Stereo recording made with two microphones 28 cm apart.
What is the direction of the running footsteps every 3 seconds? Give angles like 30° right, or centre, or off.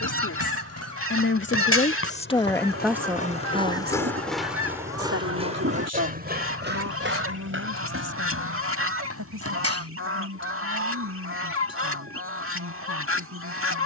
50° left, centre, 40° right, 60° right, off.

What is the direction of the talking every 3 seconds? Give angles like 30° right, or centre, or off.
40° left, 40° right, 70° right, 80° right, 80° right.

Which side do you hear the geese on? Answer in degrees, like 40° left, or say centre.
50° right.